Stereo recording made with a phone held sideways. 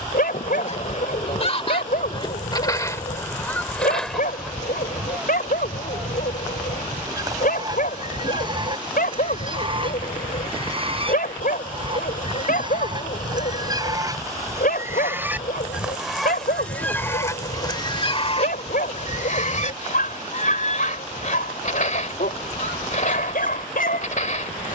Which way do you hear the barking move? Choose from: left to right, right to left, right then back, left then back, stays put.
stays put.